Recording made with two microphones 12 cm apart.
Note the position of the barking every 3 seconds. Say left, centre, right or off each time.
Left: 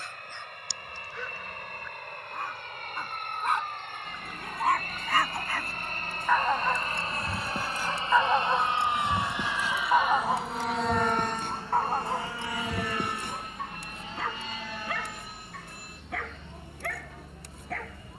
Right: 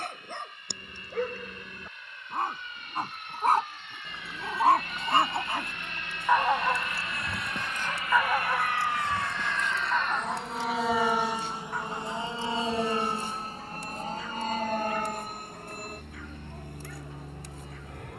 right, right, centre, left, left, left.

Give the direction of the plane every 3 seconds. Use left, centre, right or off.
left, left, left, centre, right, right.